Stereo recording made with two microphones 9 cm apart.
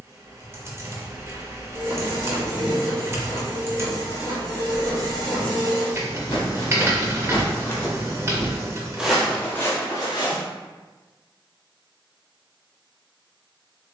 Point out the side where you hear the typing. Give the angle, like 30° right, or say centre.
30° right.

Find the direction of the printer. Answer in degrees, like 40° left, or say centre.
40° right.